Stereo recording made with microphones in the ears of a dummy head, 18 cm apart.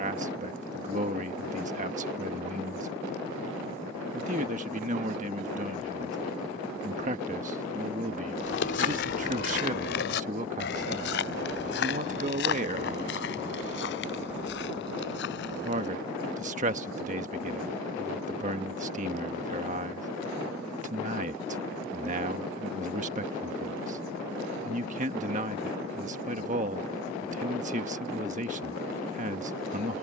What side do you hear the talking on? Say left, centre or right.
right.